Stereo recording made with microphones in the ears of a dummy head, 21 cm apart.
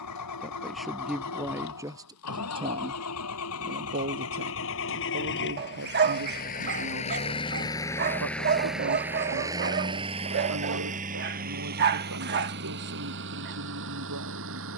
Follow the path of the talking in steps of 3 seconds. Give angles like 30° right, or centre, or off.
10° right, 40° right, 60° right, 70° right, 70° right.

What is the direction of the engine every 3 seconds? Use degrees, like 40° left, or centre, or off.
70° left, 60° left, 20° left, 30° right, 50° right.